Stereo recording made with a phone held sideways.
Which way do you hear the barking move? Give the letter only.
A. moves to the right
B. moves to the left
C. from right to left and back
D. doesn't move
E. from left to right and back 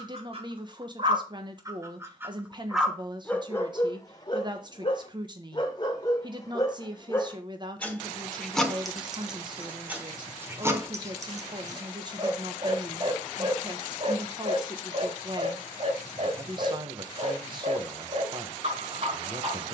C.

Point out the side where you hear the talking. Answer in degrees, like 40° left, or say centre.
30° right.